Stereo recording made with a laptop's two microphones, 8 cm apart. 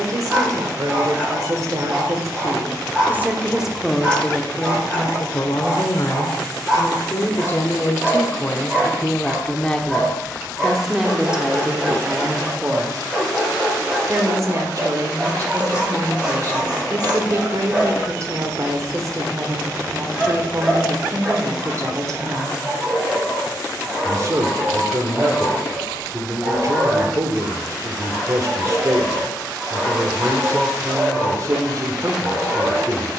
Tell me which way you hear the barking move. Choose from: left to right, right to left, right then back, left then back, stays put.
stays put.